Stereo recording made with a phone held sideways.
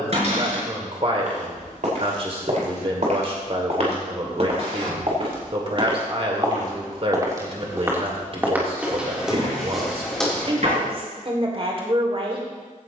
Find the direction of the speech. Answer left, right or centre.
right.